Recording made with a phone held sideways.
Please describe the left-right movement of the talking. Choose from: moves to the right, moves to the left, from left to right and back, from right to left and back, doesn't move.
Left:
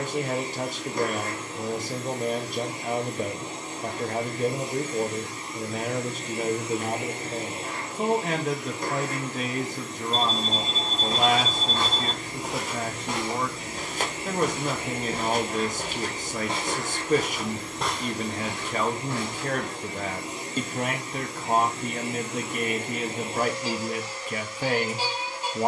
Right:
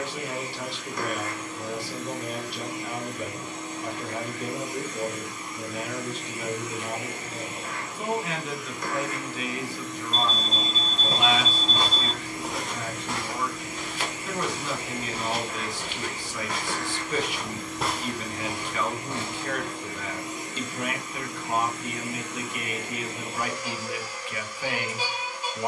doesn't move.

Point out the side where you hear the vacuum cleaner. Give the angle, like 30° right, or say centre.
30° left.